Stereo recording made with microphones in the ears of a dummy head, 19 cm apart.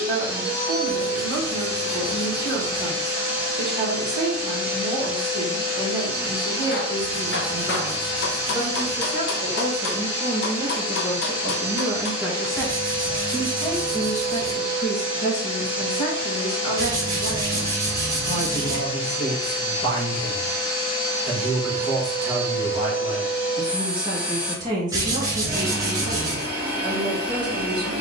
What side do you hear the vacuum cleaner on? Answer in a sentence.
In this clip you hear the vacuum cleaner in the centre.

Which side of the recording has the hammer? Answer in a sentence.
You can hear the hammer on the left.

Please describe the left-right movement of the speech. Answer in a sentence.
You can hear the speech go left and come back.